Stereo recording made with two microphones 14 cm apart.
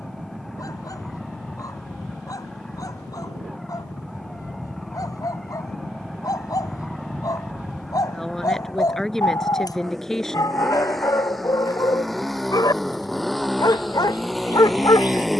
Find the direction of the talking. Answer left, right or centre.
centre.